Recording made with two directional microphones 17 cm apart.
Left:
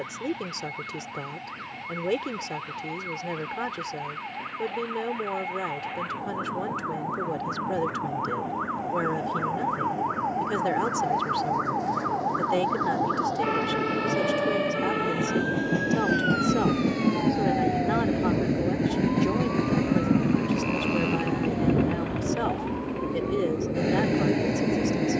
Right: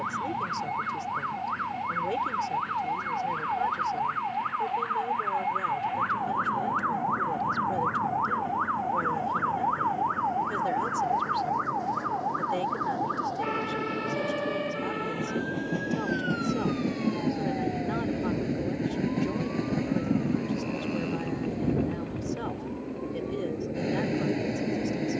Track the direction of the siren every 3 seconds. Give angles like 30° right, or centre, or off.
50° right, 40° right, 20° right, centre, 20° left, 40° left, 50° left, 60° left, 60° left.